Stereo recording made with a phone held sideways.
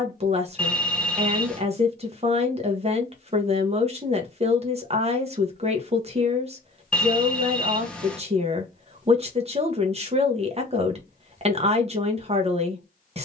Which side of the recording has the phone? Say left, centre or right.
centre.